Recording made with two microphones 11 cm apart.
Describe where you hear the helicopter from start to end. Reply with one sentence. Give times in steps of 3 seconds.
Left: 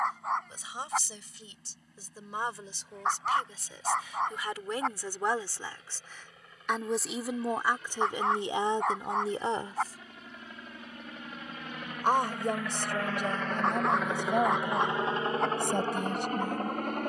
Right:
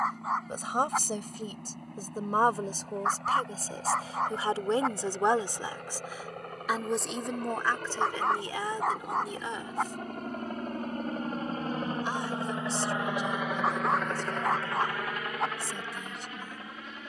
You can hear the helicopter on the right from 0 s, in the centre from 12 s and on the left from 15 s.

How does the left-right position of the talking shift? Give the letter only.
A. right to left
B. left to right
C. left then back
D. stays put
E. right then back
A.